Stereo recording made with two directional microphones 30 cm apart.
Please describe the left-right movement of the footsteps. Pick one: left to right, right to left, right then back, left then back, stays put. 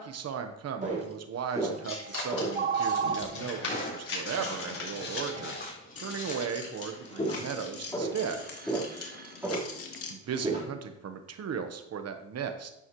left then back.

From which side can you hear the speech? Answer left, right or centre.
right.